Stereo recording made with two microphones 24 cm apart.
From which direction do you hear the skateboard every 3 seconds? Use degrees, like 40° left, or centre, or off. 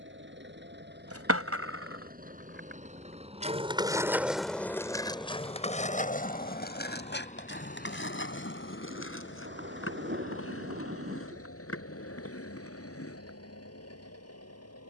60° right, centre, 40° left, 60° left, 60° left.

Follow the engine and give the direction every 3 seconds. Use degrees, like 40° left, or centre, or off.
40° right, 10° right, 30° left, 50° left, 70° left.